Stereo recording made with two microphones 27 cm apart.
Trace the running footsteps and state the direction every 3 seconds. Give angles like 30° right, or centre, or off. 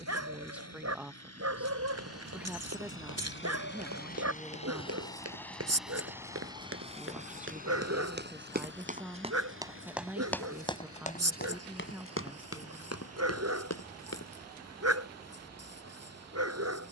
70° right, 60° right, 50° right, 10° left, 60° left, off.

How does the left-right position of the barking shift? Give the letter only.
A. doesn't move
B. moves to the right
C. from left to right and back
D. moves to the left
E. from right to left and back
A.